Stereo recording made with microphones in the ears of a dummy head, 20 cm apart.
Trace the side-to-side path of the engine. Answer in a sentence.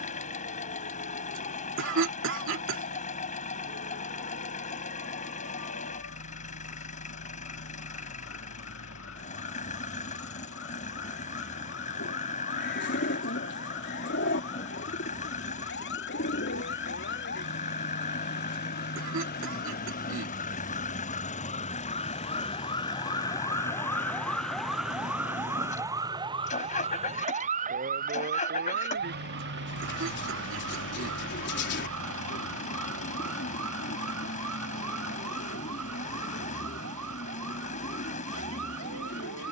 In this clip you hear the engine stay put.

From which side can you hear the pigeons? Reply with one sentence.
You can hear the pigeons on the left.